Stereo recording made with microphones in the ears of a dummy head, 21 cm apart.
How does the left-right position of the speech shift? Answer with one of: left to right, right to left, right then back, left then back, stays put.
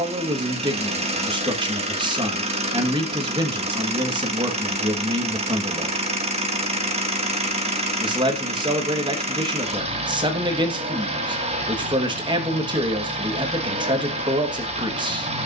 stays put.